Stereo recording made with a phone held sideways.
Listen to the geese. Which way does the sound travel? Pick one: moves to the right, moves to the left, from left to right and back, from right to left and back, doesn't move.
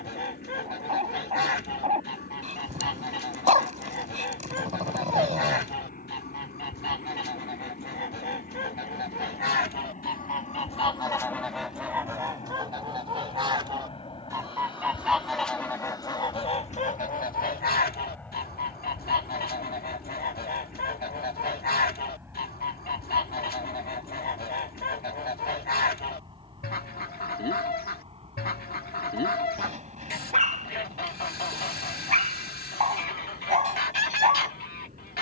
from left to right and back.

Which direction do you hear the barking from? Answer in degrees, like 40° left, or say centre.
50° right.